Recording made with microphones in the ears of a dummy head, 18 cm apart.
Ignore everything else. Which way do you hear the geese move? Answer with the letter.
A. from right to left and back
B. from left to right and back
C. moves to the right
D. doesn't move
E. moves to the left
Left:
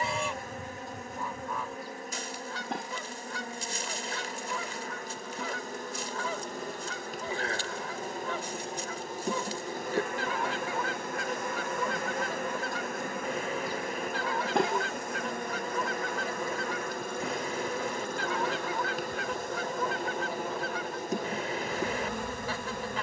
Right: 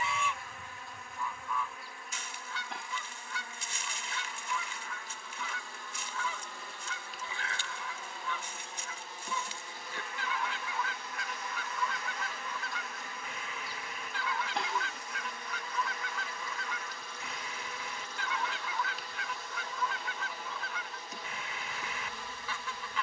D.